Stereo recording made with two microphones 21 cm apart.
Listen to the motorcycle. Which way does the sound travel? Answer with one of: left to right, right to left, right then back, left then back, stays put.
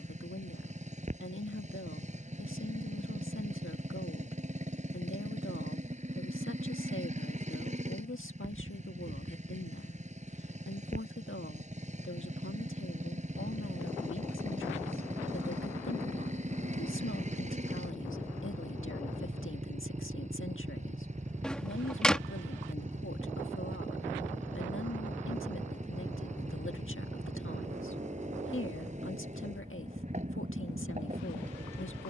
stays put.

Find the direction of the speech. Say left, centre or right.
left.